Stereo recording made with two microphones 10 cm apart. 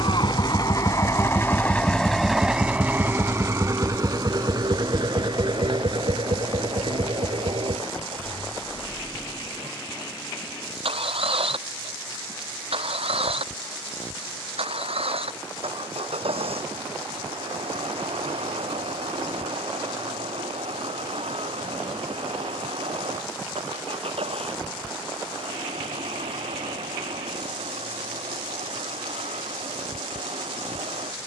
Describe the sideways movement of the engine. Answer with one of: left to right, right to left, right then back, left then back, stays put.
left to right.